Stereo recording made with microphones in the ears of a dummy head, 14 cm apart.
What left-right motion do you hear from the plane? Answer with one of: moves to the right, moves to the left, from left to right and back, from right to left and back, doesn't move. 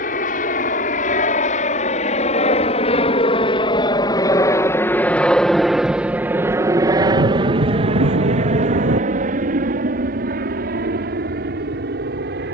moves to the right.